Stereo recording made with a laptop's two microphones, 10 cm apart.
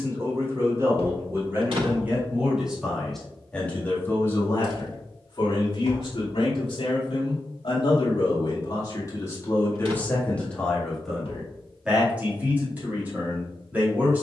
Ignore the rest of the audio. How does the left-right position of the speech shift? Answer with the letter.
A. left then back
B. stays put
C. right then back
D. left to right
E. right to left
A.